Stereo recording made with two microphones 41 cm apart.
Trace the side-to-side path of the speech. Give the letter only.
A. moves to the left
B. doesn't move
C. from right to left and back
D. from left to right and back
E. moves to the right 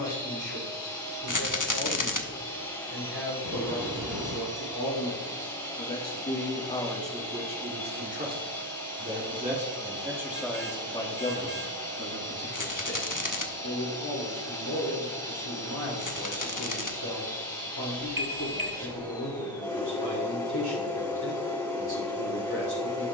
D.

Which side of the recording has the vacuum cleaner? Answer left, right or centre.
centre.